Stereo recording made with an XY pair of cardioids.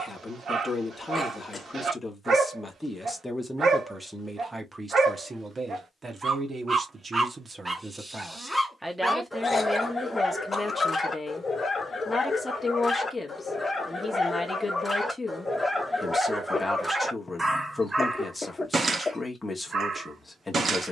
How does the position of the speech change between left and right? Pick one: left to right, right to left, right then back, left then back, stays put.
right then back.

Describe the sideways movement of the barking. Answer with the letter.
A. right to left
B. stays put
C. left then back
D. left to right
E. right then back
C.